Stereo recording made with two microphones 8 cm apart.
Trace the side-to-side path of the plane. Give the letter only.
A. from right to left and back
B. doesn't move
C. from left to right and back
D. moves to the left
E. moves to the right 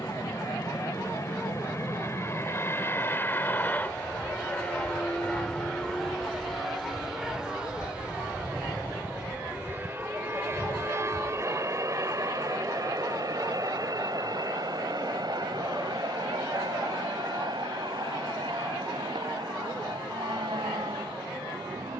E.